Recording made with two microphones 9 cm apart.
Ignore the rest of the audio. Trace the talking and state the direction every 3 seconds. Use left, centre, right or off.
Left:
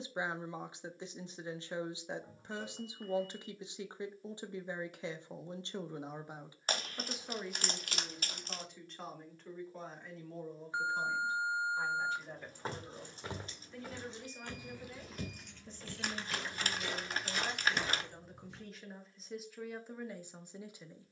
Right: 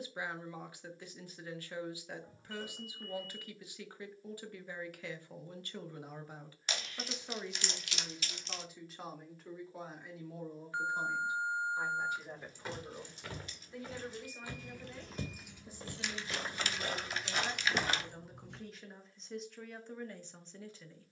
left, left, centre, centre, centre, centre, centre.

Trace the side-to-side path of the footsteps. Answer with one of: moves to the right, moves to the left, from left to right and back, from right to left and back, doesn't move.
moves to the right.